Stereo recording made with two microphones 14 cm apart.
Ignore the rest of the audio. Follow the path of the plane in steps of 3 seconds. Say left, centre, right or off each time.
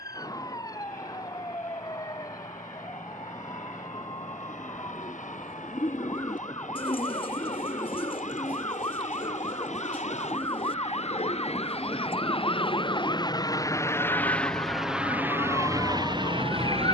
left, left, left, left, left, right.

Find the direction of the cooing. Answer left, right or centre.
left.